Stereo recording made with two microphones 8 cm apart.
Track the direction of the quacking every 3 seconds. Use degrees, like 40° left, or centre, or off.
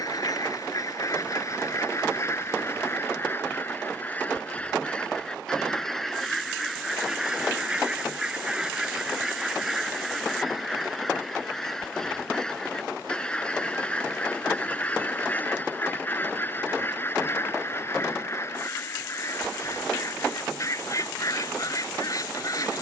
40° left, 20° left, 10° right, centre, 10° left, 20° left, 40° left, 40° left.